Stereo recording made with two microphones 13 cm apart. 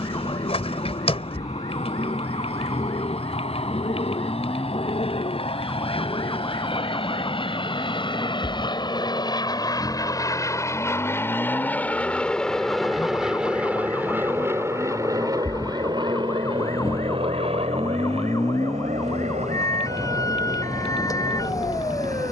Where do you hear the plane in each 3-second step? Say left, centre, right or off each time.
left, left, left, left, centre, right, right, right.